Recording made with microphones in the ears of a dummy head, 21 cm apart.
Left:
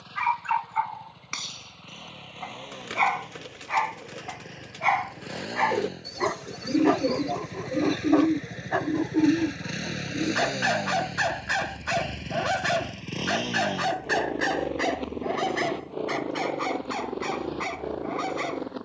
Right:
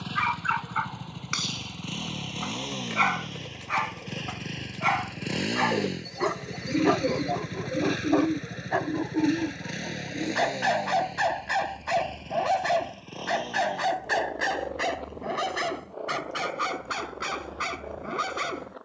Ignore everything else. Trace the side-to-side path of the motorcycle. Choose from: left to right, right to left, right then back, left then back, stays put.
right to left.